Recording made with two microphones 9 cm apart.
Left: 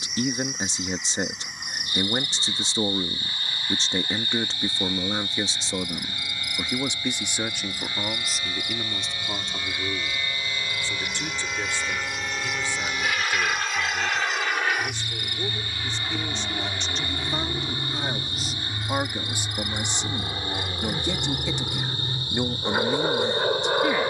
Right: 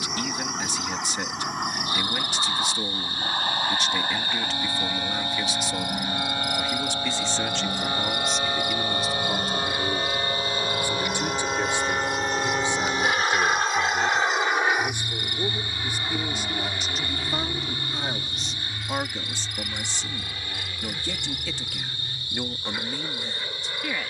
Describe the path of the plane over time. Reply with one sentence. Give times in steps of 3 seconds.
In this clip you hear the plane on the right from 0 s, in the centre from 15 s and on the left from 18 s.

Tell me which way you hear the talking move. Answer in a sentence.
You can hear the talking go right and come back.